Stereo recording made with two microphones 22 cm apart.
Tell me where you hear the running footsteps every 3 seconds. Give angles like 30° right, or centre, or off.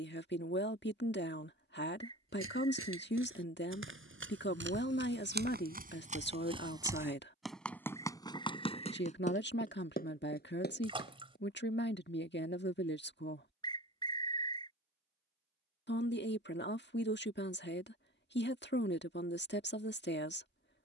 80° right, 60° right, centre, 40° left, off, off, off.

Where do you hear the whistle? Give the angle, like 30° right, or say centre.
20° left.